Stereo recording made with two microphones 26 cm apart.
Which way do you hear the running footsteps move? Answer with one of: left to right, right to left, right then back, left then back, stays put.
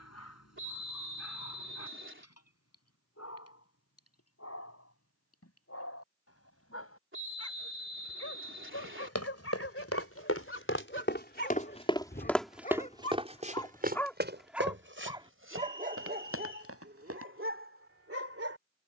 left to right.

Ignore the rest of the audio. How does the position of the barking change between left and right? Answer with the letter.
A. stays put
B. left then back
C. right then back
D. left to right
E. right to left
D.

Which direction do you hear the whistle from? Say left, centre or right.
right.